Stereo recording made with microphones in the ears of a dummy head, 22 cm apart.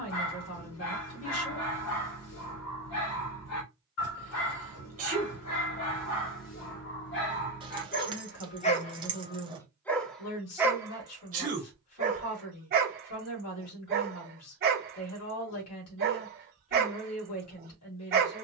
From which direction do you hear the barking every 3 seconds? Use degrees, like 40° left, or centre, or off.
60° left, 60° left, 40° left, 10° right, 40° right, 40° right.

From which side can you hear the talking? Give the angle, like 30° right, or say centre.
70° left.